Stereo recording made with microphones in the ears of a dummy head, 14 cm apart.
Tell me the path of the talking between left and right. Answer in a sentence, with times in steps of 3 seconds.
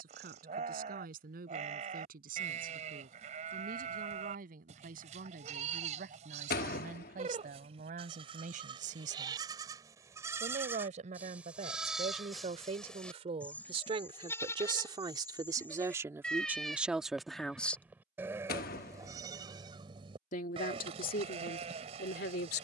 In this clip you hear the talking on the right from 0 s, in the centre from 15 s and on the left from 18 s.